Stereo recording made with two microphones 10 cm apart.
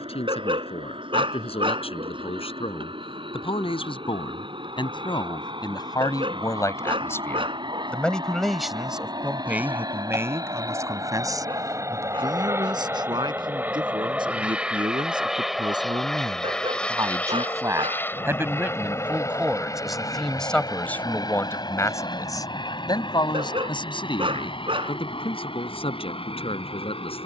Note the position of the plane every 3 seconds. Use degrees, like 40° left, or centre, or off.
70° right, 60° right, 50° right, 40° right, 20° right, 10° left, 30° left, 50° left, 60° left.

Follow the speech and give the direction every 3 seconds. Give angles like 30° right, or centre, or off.
70° left, 50° left, 20° left, 30° right, 50° right, 40° right, 10° right, 40° left, 60° left.